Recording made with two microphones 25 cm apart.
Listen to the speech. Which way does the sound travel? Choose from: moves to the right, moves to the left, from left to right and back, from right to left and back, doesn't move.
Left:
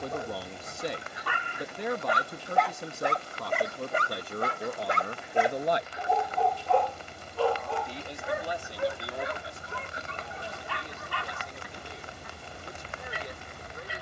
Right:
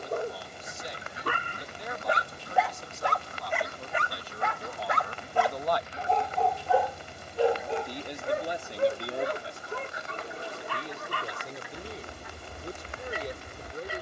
moves to the right.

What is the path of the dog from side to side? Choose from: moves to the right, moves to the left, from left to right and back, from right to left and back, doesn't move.
from right to left and back.